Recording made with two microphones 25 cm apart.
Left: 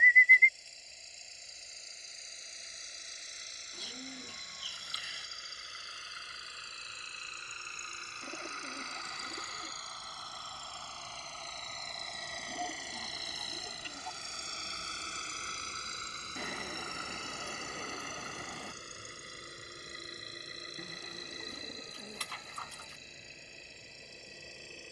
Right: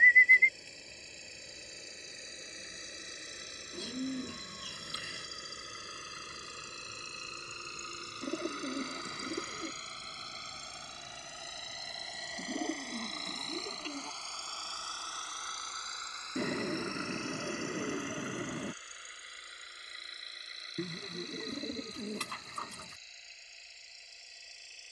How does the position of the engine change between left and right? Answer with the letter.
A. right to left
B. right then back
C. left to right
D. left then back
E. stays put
A.